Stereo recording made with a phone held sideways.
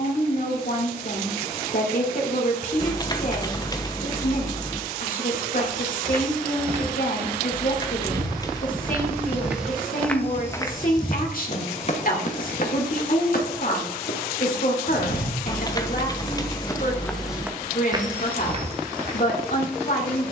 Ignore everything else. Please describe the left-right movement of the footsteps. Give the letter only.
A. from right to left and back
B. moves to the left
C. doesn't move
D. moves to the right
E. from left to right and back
A.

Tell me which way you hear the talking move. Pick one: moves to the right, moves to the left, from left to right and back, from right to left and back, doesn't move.
doesn't move.